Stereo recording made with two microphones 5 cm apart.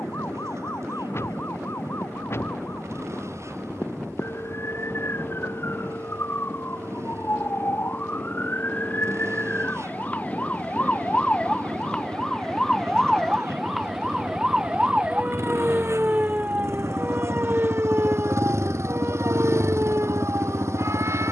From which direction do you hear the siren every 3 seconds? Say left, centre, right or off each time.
left, left, left, left, centre, right, right.